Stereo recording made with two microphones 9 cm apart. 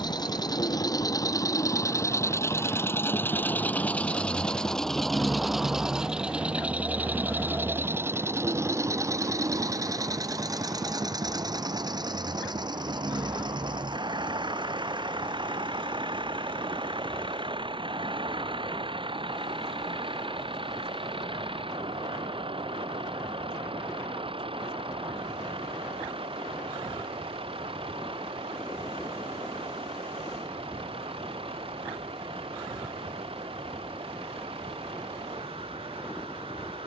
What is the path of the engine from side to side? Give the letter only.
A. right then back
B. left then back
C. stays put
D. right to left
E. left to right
E.